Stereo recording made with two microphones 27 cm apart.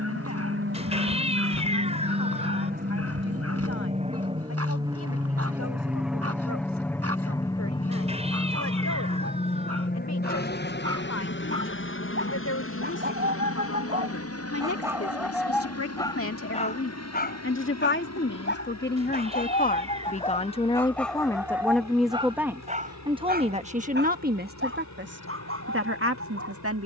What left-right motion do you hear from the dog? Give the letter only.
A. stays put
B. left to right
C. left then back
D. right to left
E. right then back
C.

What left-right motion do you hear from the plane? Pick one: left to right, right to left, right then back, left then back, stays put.
right to left.